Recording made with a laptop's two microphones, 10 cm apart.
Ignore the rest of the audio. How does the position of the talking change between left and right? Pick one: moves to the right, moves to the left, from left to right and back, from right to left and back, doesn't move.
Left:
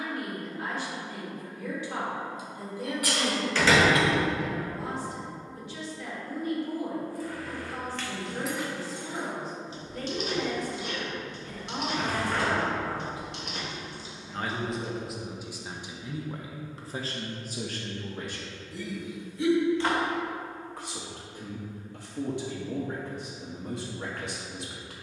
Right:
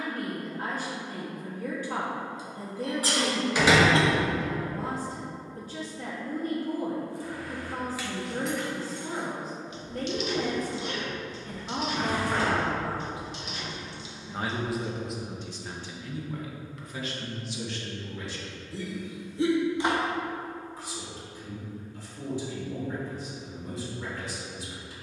moves to the left.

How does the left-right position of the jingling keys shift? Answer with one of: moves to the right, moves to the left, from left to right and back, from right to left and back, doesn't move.
from right to left and back.